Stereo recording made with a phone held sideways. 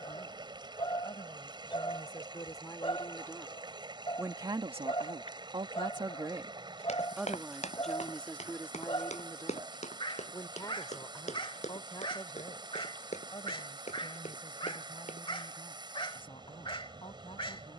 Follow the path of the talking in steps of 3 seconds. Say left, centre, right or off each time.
left, right, centre, left, left, left.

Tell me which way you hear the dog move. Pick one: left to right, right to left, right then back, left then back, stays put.
stays put.